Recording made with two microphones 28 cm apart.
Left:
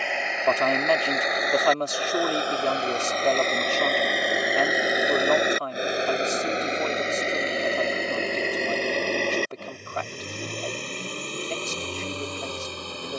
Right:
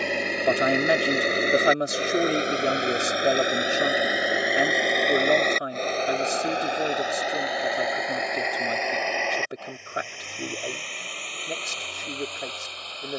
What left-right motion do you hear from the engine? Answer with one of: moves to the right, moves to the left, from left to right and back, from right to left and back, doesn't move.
moves to the left.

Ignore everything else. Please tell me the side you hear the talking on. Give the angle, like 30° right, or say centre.
20° right.